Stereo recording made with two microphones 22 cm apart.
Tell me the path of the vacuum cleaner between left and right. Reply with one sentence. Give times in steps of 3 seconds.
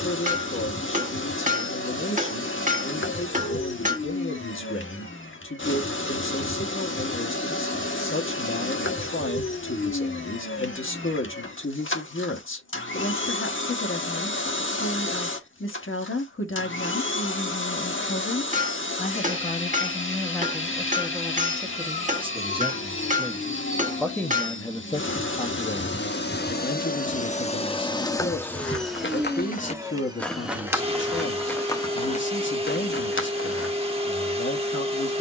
In this clip you hear the vacuum cleaner on the left from 0 s, in the centre from 27 s and on the right from 30 s.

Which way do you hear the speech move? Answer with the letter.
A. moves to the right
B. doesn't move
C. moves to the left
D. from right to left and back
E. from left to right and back
E.